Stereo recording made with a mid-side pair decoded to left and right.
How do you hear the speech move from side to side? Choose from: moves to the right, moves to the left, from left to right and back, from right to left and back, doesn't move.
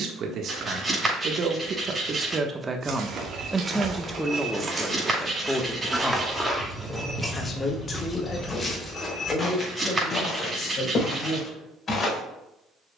moves to the left.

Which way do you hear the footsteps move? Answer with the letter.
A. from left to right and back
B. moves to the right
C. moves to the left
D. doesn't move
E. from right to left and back
C.